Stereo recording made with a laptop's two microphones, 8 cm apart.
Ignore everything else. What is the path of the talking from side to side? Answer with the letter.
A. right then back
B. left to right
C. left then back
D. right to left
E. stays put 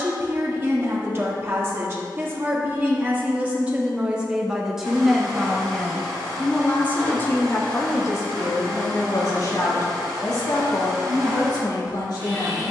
D.